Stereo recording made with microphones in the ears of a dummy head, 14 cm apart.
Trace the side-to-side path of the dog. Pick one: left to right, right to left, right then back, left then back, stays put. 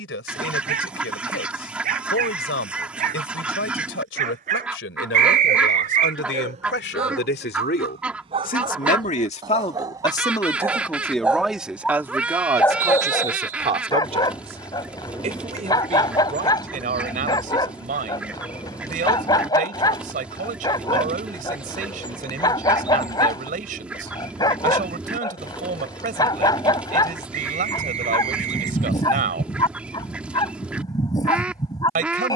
right to left.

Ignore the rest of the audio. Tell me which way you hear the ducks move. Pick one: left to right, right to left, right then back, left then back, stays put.
stays put.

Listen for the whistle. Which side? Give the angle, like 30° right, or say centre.
50° right.